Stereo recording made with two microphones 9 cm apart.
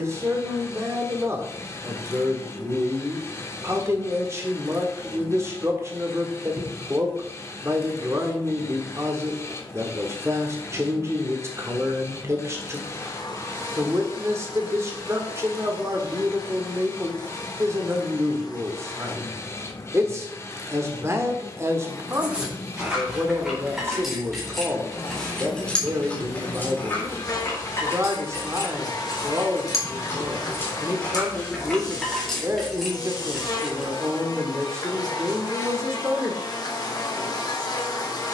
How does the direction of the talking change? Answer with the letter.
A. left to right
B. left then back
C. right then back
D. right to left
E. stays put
E.